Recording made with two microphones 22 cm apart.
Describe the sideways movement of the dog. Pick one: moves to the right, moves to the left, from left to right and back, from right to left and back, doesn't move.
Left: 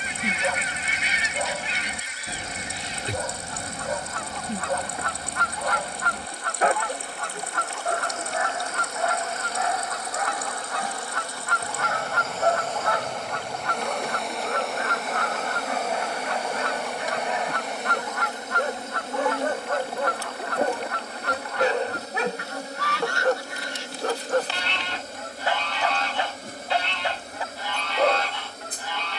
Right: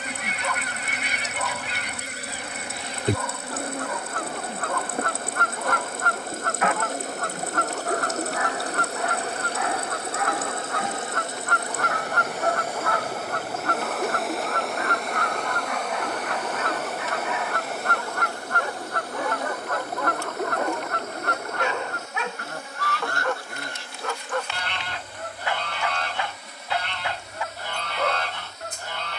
doesn't move.